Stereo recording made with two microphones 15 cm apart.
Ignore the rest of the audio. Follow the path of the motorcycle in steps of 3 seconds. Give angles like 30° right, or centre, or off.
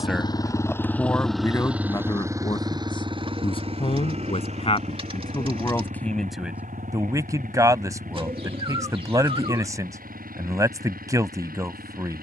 centre, 40° right, 60° right, 60° right.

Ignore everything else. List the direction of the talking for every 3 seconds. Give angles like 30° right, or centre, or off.
20° left, 30° left, 20° right, 20° right.